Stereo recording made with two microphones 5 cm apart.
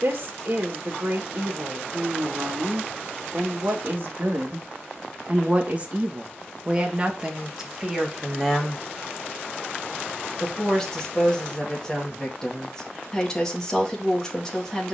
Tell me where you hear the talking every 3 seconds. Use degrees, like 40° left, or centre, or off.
60° right, 40° right, 10° right, 10° left, 10° left.